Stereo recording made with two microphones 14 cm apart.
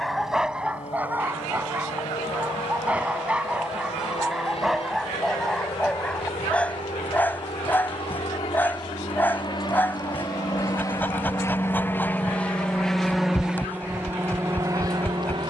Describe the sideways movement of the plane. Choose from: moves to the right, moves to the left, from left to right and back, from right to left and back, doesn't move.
moves to the right.